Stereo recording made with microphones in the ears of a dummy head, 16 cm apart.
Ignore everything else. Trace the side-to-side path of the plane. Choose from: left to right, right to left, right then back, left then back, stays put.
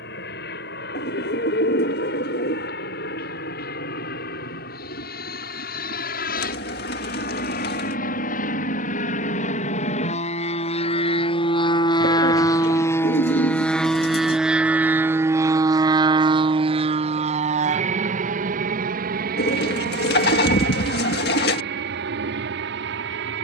left to right.